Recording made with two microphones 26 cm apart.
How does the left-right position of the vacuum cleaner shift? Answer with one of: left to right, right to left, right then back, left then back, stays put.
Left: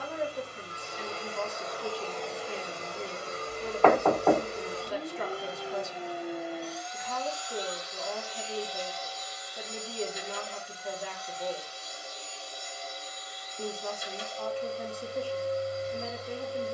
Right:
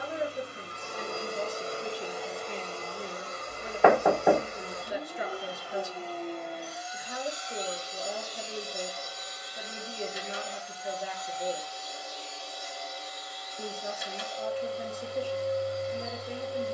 left then back.